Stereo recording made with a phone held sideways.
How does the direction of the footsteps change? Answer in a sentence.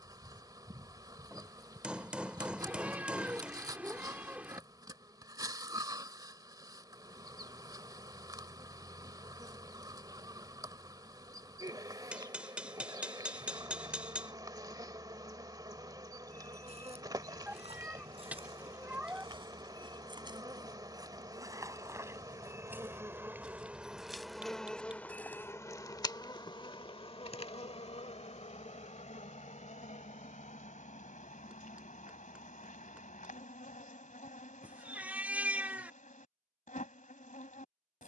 In this clip you hear the footsteps go from the right side to the left.